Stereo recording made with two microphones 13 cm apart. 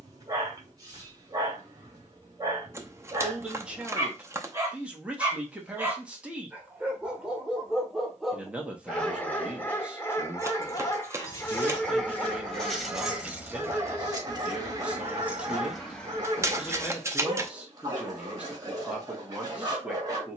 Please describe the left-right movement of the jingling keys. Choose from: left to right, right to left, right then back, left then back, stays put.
right then back.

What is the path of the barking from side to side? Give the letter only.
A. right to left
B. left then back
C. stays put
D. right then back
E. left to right
B.